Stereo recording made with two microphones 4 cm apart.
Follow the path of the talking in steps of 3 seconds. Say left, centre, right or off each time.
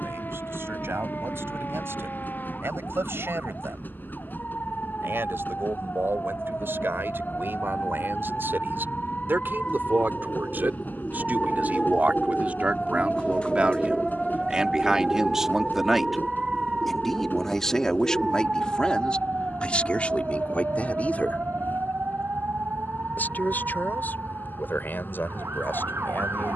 right, right, right, right, right, centre, left, left, left.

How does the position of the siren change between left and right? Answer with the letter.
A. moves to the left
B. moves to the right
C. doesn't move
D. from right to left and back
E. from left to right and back
B.